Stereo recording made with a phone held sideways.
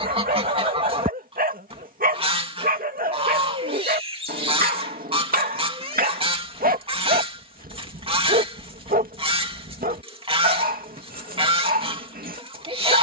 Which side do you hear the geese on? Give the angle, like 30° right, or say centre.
40° right.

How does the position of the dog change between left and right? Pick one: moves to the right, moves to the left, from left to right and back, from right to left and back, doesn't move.
doesn't move.